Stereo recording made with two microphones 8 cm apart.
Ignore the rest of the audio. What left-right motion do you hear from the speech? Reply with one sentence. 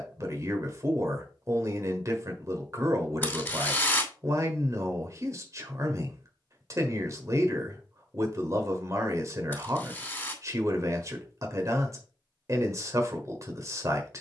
You can hear the speech stay in one place.